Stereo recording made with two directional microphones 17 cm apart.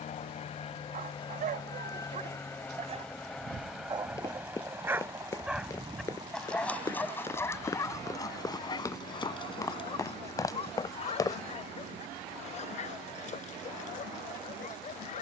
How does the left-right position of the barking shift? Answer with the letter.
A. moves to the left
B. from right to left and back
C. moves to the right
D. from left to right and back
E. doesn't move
A.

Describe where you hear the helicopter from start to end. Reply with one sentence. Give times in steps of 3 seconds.
In this clip you hear the helicopter on the left from 0 s, in the centre from 3 s and on the right from 6 s.